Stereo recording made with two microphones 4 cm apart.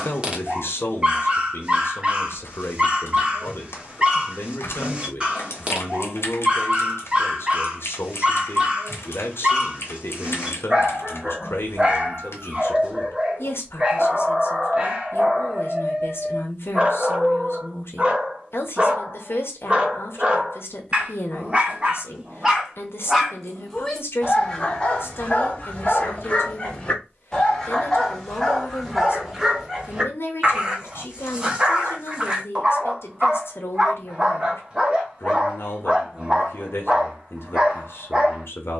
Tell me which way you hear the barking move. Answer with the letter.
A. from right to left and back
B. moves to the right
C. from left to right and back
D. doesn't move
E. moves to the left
A.